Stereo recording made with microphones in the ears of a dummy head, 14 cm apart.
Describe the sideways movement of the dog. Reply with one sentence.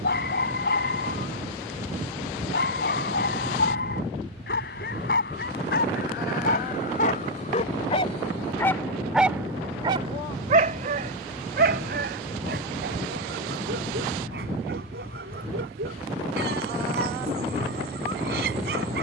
You can hear the dog move to the right.